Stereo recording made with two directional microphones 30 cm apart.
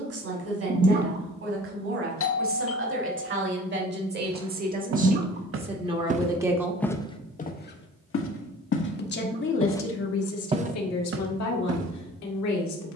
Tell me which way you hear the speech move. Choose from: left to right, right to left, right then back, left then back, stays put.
right to left.